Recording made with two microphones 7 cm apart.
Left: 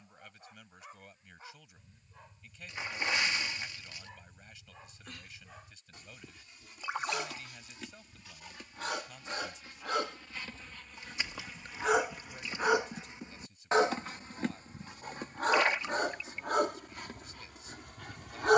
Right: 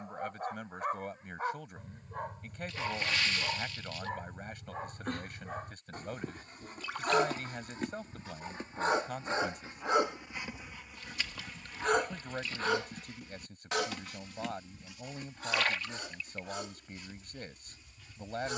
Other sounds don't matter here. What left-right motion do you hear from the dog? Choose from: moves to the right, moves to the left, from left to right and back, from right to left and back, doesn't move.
moves to the left.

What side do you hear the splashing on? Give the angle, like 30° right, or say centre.
20° left.